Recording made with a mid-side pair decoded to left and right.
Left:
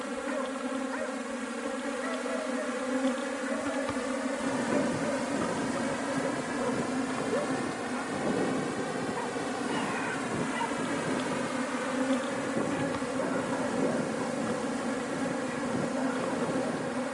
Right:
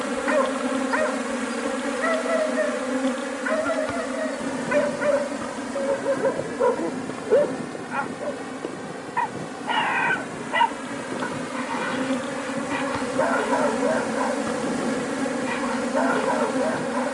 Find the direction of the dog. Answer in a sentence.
In this clip you hear the dog on the right.